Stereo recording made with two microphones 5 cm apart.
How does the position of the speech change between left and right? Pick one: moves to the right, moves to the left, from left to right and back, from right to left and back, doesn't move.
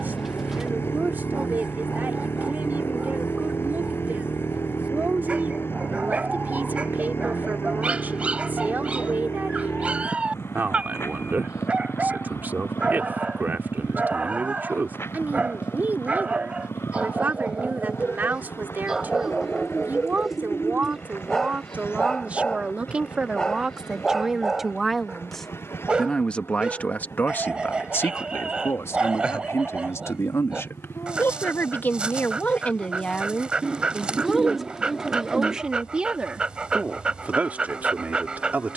from right to left and back.